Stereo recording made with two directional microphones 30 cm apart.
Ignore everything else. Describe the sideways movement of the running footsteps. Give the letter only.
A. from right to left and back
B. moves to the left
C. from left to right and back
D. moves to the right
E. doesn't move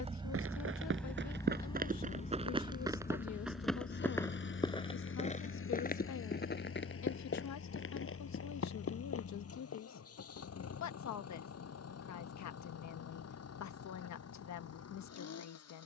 B.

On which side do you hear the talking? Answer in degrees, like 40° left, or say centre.
60° left.